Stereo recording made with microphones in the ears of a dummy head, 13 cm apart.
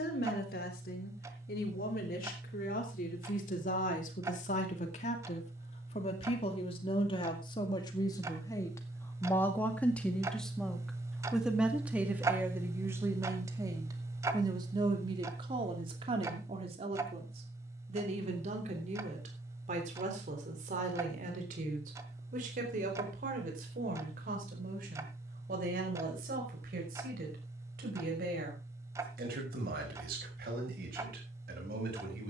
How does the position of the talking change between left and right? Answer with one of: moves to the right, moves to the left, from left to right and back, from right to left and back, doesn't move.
moves to the right.